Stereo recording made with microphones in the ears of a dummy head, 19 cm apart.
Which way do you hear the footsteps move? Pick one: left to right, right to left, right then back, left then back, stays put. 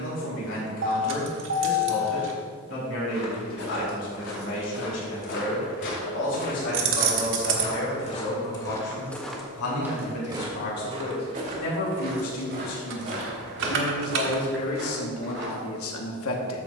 left to right.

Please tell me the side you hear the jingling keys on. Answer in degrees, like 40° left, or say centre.
60° right.